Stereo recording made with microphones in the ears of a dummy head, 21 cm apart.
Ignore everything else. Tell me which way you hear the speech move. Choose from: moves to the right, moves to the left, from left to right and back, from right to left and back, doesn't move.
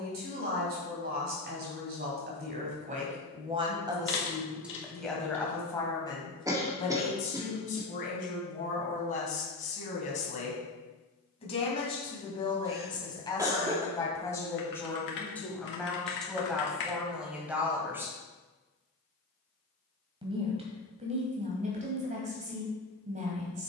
from right to left and back.